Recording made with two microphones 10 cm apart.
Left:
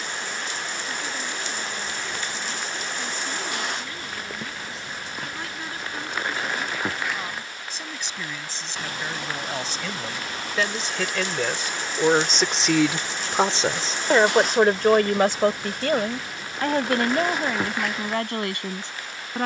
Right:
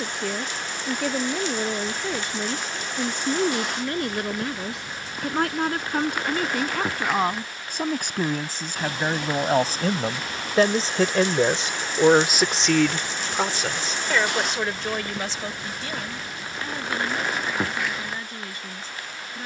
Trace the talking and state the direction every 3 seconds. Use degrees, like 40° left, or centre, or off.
70° right, 70° right, 60° right, 40° right, 20° left, 70° left, 80° left.